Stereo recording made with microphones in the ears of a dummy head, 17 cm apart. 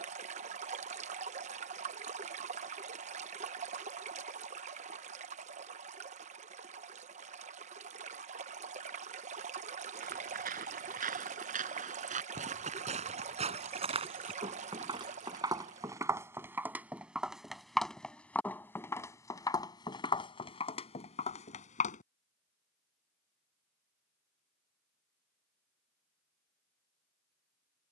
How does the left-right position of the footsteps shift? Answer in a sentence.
In this clip you hear the footsteps travel towards the left.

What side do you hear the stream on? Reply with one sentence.
In this clip you hear the stream on the right.